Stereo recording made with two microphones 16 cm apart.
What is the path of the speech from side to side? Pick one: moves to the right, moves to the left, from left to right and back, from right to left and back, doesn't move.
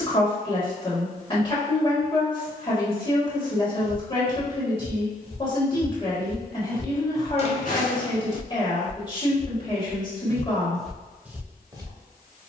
doesn't move.